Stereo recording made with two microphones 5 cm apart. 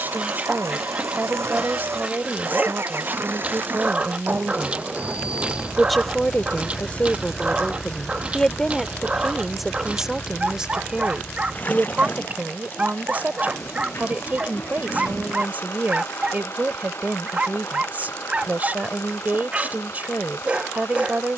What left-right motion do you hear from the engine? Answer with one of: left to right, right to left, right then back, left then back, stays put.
right to left.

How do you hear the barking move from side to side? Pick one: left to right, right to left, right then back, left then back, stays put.
stays put.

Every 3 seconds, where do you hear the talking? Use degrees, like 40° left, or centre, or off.
40° right, 40° right, 20° left, 10° right, 30° right, 40° right, 40° right.